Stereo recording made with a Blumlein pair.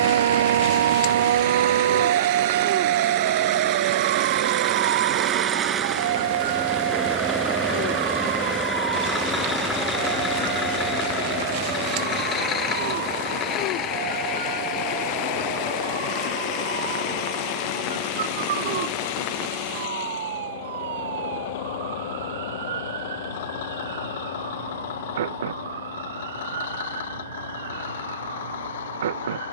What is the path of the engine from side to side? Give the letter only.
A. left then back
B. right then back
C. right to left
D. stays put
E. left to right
C.